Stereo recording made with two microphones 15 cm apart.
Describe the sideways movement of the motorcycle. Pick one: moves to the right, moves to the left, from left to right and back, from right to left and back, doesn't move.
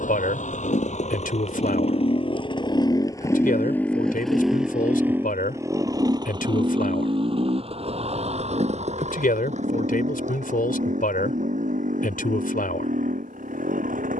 moves to the right.